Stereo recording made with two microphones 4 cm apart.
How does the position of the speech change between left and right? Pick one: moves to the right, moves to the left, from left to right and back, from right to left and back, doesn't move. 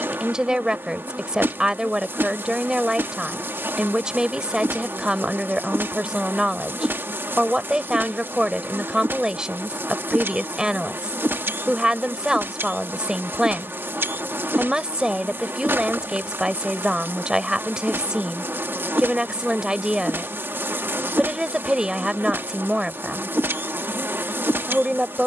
doesn't move.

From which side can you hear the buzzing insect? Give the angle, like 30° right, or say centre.
60° right.